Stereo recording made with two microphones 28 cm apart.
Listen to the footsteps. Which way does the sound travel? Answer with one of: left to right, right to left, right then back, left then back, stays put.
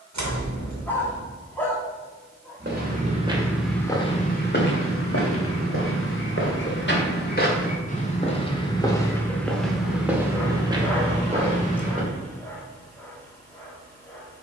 left then back.